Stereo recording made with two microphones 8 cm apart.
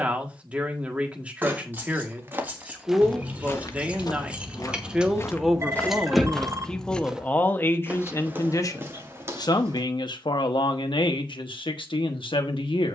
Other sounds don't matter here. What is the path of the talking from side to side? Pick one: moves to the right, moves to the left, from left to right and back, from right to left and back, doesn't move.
moves to the left.